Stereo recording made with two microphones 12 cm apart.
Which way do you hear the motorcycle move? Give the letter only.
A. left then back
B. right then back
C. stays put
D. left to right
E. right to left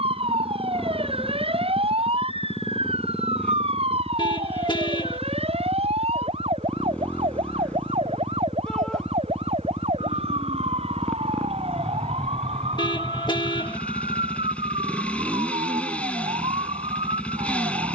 C.